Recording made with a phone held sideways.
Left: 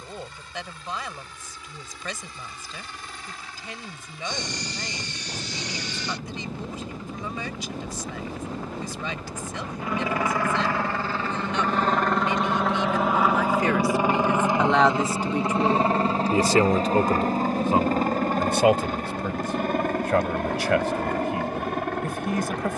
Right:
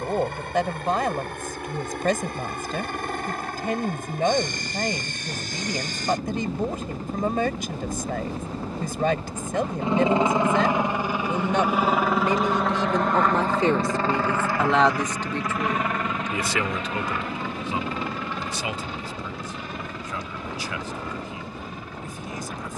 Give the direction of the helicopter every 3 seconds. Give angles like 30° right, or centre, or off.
60° right, 60° right, 40° right, 20° right, 10° left, 30° left, 50° left, 60° left.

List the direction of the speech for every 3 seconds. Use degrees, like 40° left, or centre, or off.
50° right, 50° right, 50° right, 50° right, 30° right, 30° left, 70° left, 70° left.